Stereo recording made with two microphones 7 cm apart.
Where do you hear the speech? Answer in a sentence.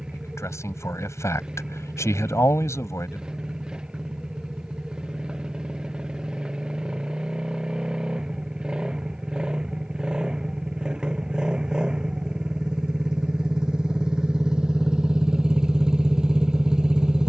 You can hear the speech on the left.